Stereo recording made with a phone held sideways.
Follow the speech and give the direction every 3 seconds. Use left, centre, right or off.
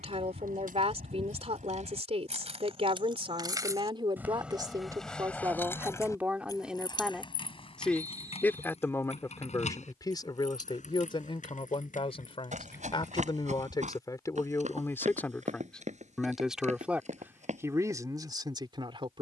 right, right, centre, left, left, centre, right.